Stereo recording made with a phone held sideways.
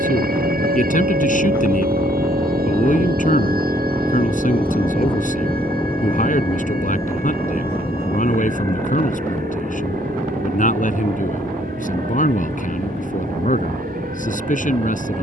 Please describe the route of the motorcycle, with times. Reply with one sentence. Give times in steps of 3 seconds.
In this clip you hear the motorcycle on the right from 0 s, in the centre from 3 s and on the left from 6 s.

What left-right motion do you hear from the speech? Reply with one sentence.
In this clip you hear the speech stay put.